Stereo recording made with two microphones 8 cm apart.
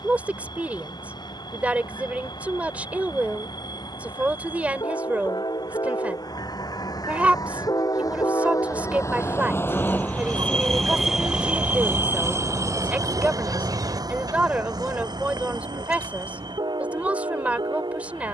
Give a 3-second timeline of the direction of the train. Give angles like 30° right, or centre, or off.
80° left, 70° left, 60° left, 10° left, 50° right, 70° right.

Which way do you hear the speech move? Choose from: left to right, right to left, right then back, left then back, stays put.
stays put.